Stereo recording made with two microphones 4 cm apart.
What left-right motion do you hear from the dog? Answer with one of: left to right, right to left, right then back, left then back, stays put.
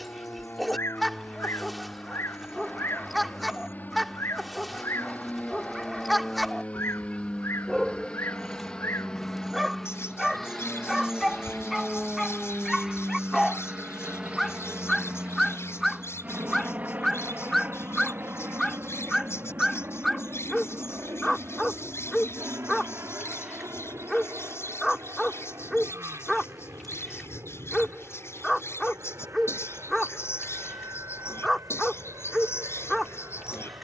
stays put.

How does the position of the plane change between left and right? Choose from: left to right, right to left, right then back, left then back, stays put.
left to right.